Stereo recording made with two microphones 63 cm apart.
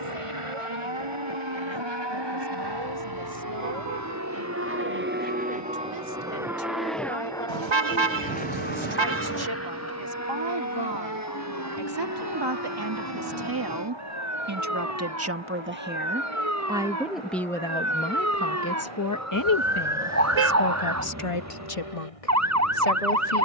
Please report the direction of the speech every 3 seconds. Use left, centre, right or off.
right, right, right, right, right, centre, left, left.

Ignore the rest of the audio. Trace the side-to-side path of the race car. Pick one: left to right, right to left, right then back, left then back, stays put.
right to left.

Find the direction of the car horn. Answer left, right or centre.
right.